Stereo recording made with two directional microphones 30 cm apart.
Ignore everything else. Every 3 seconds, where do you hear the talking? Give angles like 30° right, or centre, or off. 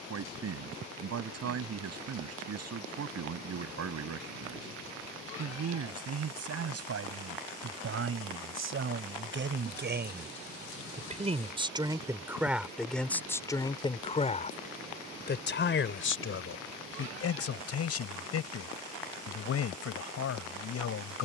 60° right, 60° right, 50° right, 30° right, 10° left, 50° left, 50° left.